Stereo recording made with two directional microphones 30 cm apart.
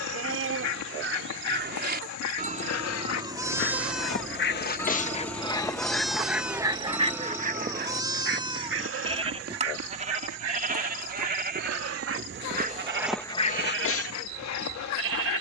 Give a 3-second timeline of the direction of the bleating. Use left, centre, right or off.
right, centre, centre, right, right.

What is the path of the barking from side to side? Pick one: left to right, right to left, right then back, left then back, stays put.
right then back.